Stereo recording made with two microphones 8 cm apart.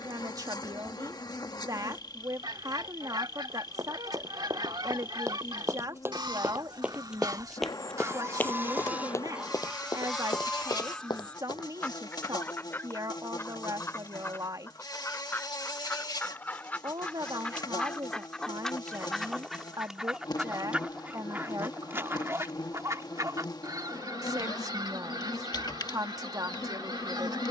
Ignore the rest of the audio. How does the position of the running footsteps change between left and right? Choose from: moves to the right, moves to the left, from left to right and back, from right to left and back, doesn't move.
moves to the left.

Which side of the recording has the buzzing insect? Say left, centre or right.
left.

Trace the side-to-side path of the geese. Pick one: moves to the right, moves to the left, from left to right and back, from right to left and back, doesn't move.
from right to left and back.